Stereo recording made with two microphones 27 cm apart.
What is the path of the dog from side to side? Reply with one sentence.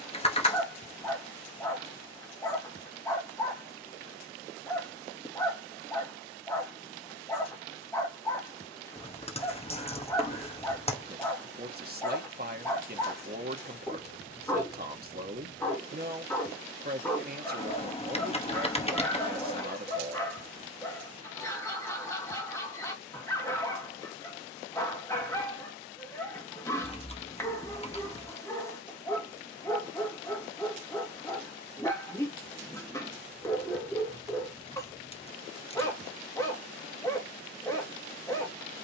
You can hear the dog stay in one place.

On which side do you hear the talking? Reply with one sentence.
In this clip you hear the talking on the right.